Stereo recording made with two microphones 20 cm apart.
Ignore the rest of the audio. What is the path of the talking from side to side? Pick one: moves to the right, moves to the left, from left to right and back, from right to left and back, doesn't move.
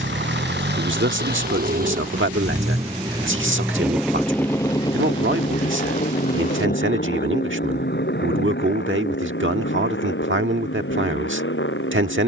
doesn't move.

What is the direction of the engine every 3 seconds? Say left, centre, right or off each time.
right, centre, left, left.